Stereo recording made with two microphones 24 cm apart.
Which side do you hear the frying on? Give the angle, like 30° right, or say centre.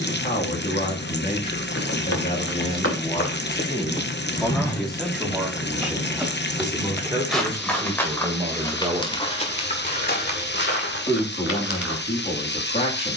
50° left.